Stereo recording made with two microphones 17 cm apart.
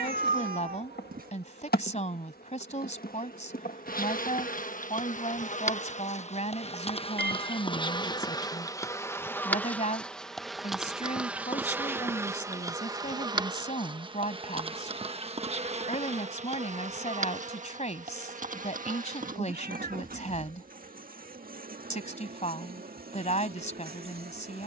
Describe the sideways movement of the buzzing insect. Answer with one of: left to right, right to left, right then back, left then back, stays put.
left to right.